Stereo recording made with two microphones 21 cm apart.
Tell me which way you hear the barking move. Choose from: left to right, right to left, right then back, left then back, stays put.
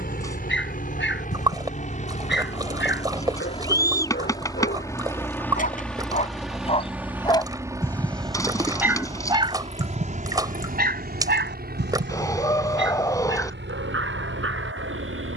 left to right.